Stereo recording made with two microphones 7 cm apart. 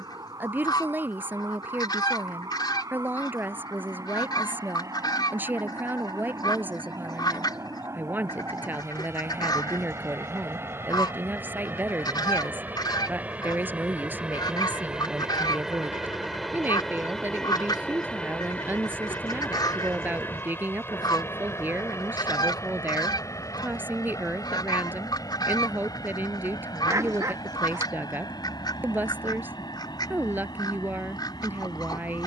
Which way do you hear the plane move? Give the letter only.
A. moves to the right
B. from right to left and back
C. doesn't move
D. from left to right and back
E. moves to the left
E.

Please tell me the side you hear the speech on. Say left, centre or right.
right.